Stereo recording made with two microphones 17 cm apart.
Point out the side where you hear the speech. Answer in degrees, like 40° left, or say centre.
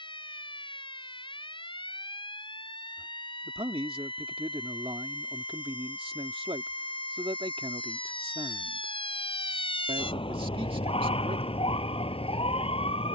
30° right.